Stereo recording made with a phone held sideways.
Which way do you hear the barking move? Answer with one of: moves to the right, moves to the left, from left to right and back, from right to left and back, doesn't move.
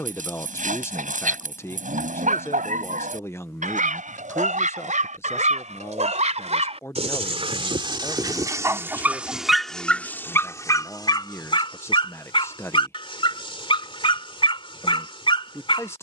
moves to the left.